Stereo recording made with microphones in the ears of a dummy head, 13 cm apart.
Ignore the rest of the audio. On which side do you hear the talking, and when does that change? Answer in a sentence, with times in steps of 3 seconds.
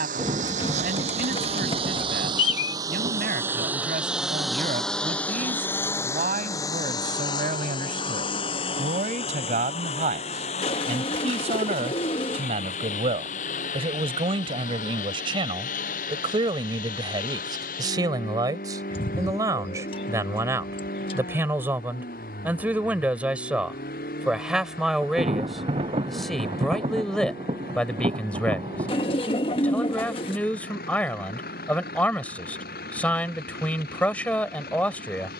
You can hear the talking on the right from 0 s and in the centre from 21 s.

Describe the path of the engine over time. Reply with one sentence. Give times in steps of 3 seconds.
You can hear the engine on the right from 0 s, in the centre from 3 s and on the left from 6 s.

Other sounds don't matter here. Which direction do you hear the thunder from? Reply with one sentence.
You can hear the thunder on the right.